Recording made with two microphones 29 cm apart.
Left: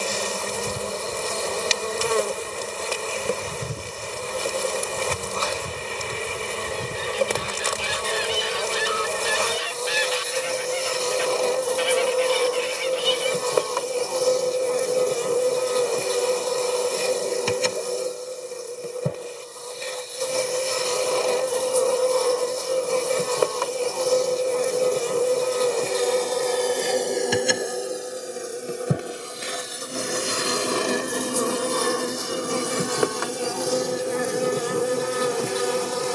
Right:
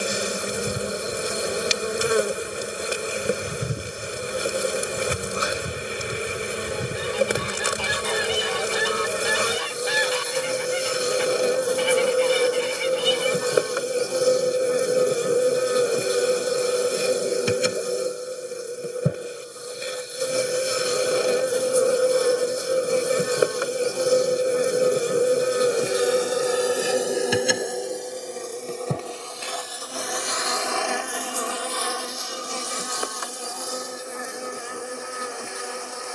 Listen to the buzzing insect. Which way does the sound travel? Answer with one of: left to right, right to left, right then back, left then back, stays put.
right to left.